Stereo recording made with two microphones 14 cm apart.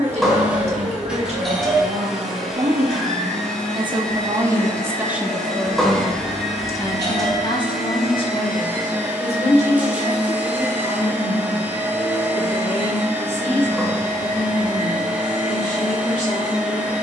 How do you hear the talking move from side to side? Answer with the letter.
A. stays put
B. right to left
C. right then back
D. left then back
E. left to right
B.